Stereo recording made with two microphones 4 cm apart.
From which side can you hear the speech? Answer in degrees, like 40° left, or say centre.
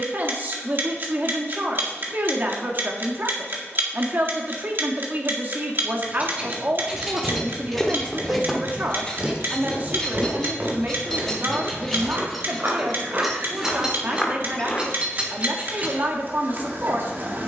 40° right.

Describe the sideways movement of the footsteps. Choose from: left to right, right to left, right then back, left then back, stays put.
right then back.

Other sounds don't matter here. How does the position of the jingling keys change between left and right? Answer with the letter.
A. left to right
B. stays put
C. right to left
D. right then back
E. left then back
E.